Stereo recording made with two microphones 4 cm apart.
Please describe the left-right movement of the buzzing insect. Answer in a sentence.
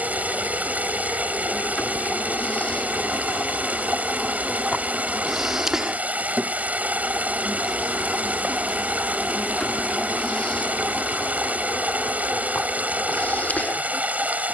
You can hear the buzzing insect move from left to right and back again.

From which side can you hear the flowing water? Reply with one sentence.
You can hear the flowing water on the right.